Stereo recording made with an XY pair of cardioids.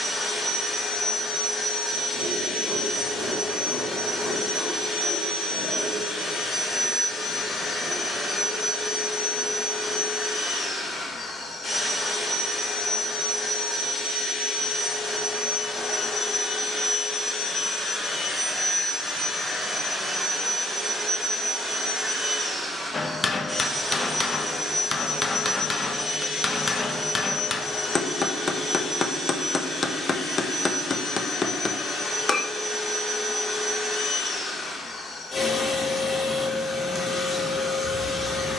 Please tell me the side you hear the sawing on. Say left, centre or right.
centre.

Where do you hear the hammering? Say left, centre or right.
left.